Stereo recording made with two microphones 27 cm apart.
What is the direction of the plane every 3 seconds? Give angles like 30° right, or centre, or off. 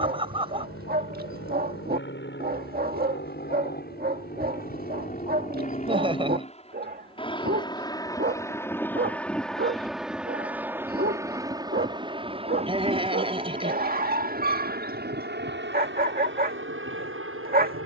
50° left, 30° left, 20° left, 10° right, 30° right, 40° right.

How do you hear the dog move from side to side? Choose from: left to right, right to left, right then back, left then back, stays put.
stays put.